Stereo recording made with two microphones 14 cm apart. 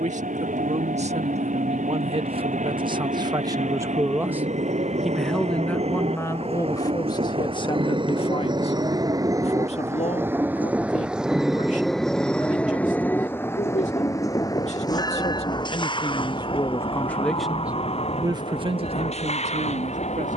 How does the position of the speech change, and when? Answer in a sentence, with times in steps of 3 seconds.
You can hear the speech on the right from 0 s, in the centre from 3 s, on the left from 6 s and on the right from 18 s.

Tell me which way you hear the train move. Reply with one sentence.
In this clip you hear the train move from right to left.